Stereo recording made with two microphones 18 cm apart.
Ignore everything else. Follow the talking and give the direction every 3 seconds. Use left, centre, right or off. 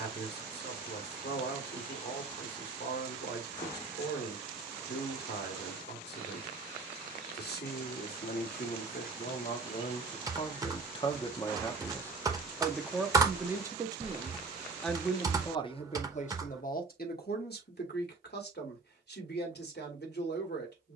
left, left, left, left, centre, left, left.